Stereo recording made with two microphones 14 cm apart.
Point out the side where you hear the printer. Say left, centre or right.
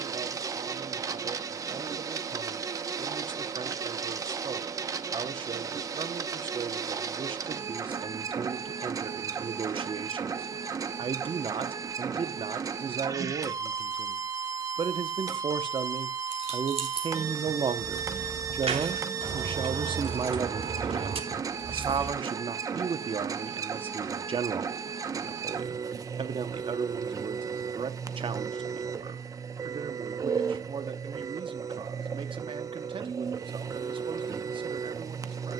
right.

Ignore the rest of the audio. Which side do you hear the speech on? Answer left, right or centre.
right.